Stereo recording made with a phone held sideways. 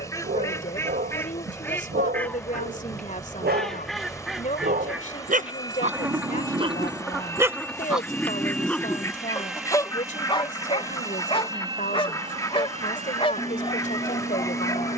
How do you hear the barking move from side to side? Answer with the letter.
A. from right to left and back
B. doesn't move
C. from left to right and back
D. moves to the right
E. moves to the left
E.